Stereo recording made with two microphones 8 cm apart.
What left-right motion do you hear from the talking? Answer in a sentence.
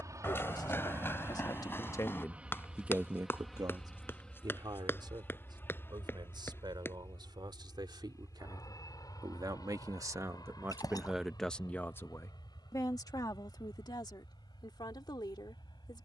In this clip you hear the talking move from left to right and back again.